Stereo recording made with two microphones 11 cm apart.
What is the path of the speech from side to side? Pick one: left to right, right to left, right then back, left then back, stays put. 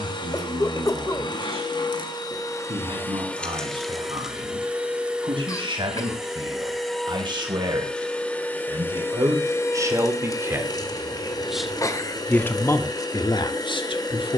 right to left.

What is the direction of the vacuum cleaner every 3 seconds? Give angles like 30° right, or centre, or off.
40° left, centre, 10° left, 30° left, 40° left.